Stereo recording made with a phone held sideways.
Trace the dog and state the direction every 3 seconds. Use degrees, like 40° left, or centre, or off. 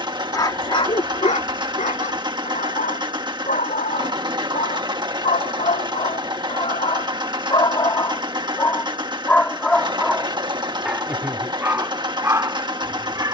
60° left, 70° left, 40° left, centre, 20° right.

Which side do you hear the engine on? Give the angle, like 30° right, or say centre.
30° right.